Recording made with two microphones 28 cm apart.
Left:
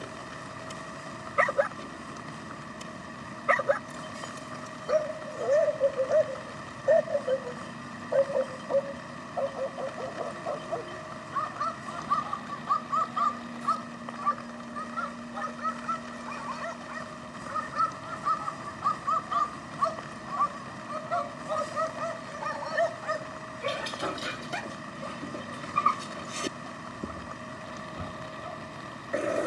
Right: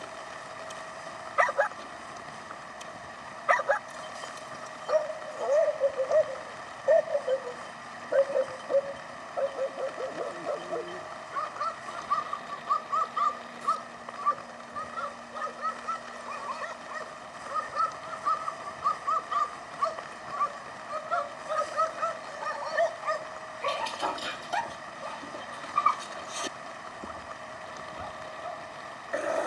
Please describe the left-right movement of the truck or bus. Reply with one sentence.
In this clip you hear the truck or bus stay put.